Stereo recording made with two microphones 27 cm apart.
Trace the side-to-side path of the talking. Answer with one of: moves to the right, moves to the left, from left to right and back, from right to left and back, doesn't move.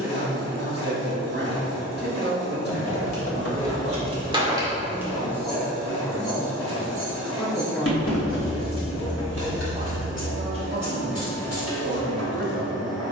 from right to left and back.